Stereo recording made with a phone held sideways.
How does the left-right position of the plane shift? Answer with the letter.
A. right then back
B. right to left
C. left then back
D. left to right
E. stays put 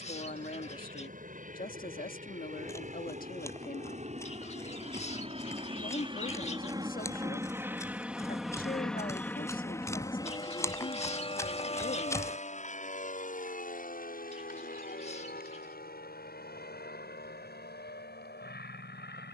B.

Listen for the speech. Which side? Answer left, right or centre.
left.